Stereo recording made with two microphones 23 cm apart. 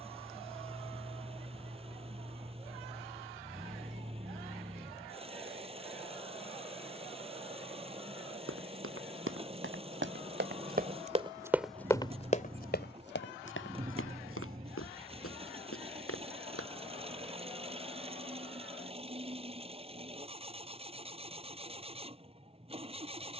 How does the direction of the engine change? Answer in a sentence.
In this clip you hear the engine stay in one place.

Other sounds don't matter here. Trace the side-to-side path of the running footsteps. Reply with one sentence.
You can hear the running footsteps move from right to left.